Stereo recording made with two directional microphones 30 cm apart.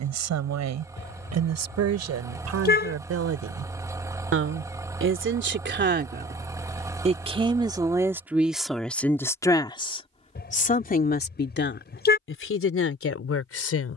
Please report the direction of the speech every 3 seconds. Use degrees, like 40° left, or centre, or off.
60° right, 40° right, 10° right, 20° left, 50° left.